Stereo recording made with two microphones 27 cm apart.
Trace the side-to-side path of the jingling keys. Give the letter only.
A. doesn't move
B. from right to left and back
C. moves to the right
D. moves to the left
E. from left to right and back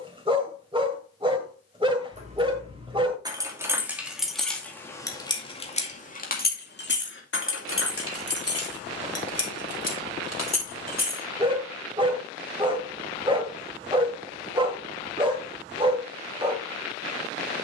D.